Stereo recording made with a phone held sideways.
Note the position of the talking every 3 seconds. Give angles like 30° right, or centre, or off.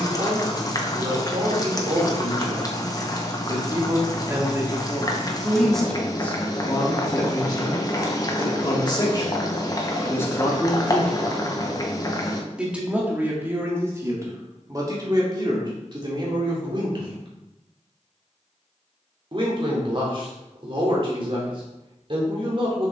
40° right, 10° right, 30° left, 20° left, 20° right, 40° right, 40° right, 40° right.